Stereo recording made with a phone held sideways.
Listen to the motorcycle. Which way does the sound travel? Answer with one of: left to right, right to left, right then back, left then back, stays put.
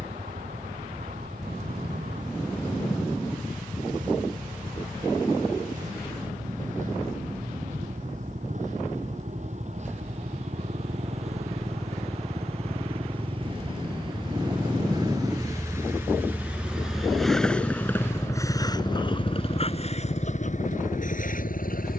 right to left.